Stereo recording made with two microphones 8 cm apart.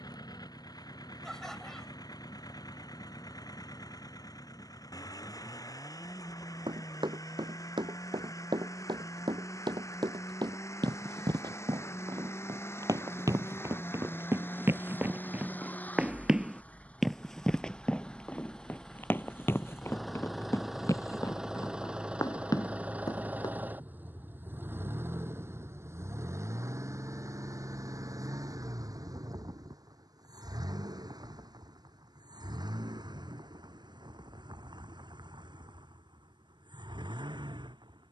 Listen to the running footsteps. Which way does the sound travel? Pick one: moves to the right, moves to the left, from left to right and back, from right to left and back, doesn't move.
moves to the left.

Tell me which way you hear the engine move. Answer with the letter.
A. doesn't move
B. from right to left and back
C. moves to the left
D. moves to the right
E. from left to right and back
D.